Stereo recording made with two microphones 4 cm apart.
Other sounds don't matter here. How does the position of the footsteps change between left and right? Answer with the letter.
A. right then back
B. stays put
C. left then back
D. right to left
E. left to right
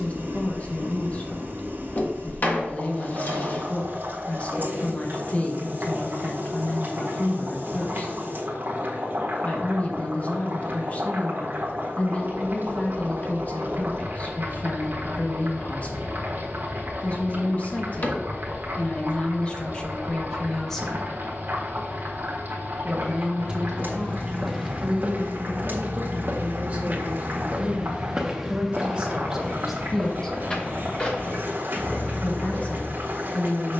A.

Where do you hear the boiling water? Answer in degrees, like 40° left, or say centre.
50° right.